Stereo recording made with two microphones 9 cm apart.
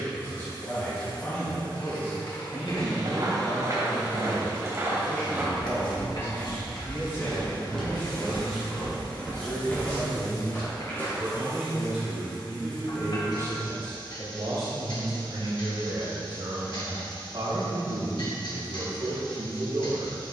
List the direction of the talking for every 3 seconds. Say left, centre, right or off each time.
left, left, left, centre, right, right, right.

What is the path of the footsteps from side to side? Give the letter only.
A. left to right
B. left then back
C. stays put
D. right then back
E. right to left
E.